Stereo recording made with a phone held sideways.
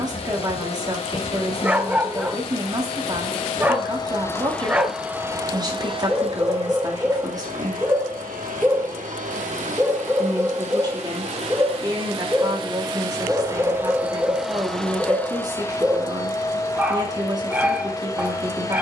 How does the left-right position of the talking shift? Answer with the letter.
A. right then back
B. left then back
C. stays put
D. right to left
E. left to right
C.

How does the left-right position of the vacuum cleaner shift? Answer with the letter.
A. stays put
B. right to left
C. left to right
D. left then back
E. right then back
E.